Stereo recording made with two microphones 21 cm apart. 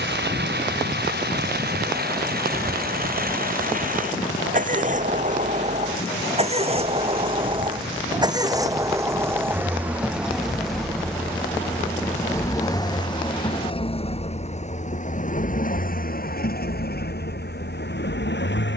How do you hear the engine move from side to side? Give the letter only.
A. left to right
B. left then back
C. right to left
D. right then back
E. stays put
C.